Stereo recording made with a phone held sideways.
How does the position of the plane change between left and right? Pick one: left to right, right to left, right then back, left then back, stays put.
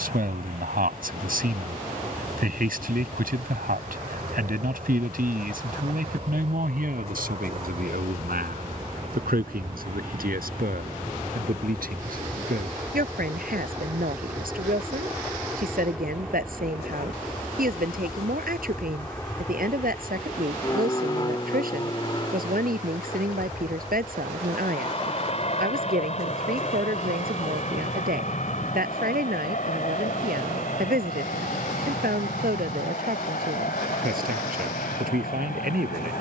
right to left.